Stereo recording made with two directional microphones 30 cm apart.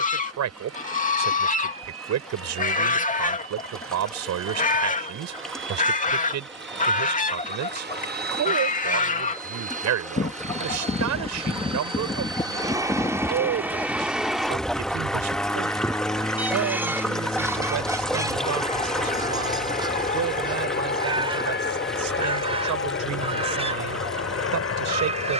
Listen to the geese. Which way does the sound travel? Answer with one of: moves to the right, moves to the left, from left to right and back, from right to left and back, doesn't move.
moves to the right.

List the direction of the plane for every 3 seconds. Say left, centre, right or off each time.
right, right, right, right, centre, centre, left, left, left.